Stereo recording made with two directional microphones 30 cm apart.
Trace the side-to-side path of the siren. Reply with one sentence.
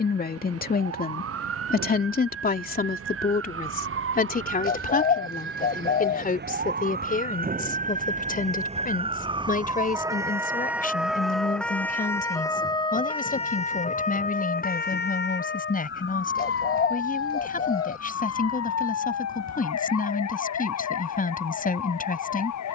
You can hear the siren go from the right side to the left.